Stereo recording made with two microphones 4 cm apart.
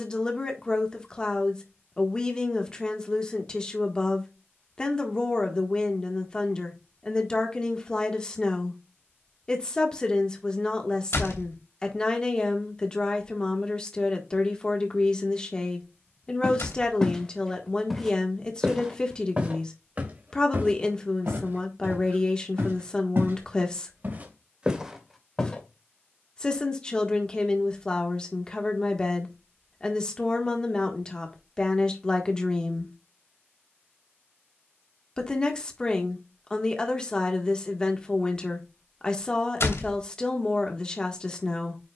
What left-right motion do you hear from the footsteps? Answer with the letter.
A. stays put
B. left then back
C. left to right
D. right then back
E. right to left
D.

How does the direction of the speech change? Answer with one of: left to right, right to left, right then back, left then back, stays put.
stays put.